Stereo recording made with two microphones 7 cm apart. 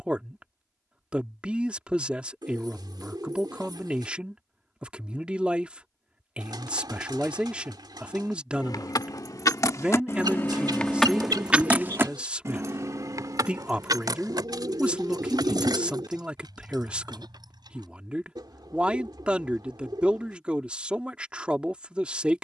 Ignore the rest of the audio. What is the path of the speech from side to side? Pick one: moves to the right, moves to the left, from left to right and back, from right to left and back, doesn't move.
doesn't move.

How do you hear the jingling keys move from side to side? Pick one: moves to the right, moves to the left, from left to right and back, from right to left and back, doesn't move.
moves to the right.